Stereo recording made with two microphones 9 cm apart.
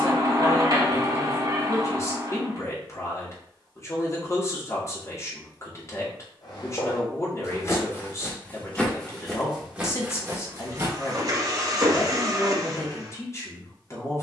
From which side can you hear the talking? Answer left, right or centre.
left.